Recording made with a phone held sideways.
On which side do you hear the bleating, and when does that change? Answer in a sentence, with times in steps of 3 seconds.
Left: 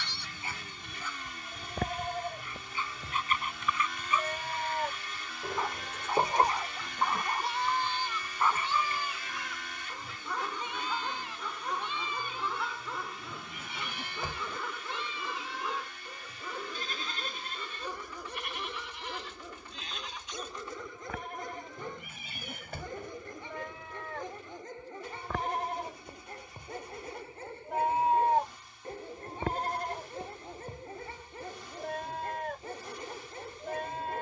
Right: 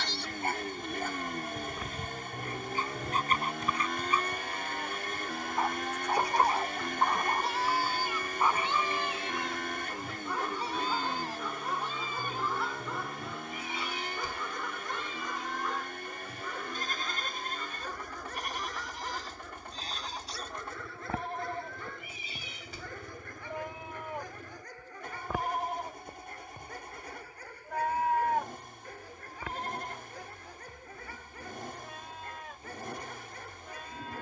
You can hear the bleating on the left from 0 s, in the centre from 6 s, on the right from 9 s, in the centre from 24 s and on the left from 27 s.